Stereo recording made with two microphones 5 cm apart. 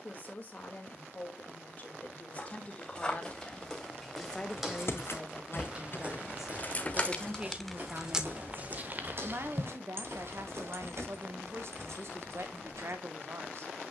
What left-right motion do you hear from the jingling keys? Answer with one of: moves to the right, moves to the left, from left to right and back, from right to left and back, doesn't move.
moves to the right.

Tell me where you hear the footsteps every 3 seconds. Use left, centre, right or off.
left, centre, right, right, off.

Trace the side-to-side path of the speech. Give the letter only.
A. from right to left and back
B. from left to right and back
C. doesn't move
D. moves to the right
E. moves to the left
D.